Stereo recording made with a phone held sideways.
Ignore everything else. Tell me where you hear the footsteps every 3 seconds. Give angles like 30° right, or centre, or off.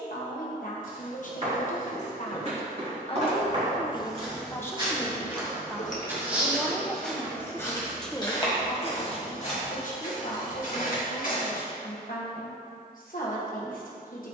50° right, 30° right, 10° left, 60° left, off.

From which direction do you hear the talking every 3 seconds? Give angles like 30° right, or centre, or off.
50° left, 20° left, centre, 60° left, 60° left.